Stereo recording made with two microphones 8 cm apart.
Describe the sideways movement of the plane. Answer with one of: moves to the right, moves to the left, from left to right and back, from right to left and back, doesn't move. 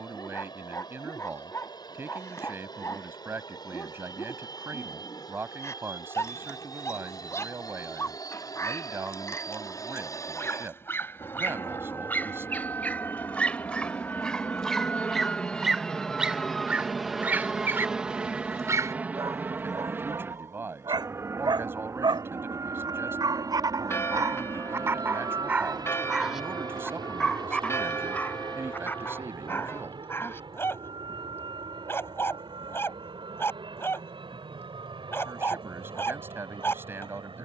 moves to the right.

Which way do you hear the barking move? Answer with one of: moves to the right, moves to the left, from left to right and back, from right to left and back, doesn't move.
from left to right and back.